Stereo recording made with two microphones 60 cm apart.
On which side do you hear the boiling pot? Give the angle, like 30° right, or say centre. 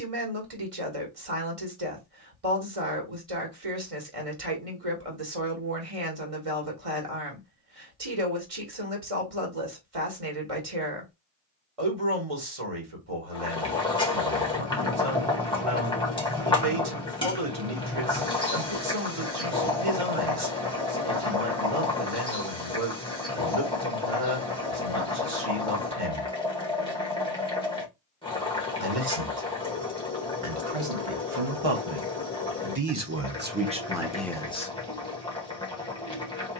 10° left.